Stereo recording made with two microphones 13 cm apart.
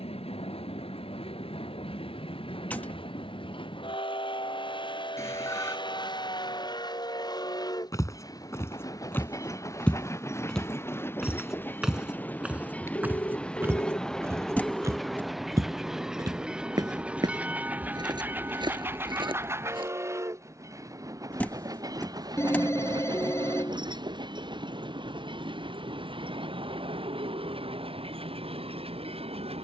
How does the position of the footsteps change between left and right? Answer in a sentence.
You can hear the footsteps travel towards the right.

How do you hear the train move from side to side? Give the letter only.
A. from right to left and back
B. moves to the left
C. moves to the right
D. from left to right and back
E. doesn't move
C.